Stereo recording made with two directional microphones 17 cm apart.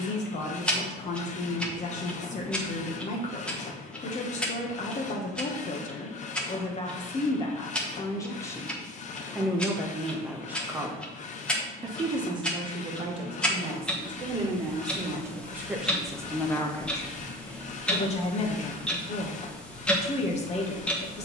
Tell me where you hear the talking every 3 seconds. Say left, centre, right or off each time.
left, left, left, centre, right, centre, left.